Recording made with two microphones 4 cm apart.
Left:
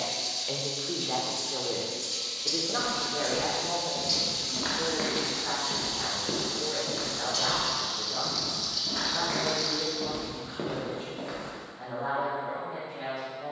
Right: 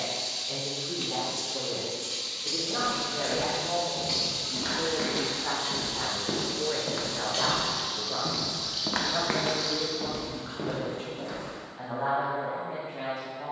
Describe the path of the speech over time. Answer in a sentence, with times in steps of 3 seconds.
In this clip you hear the speech on the left from 0 s, in the centre from 3 s and on the right from 6 s.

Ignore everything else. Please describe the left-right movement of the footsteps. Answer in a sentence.
In this clip you hear the footsteps go right and come back.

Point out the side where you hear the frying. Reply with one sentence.
In this clip you hear the frying on the right.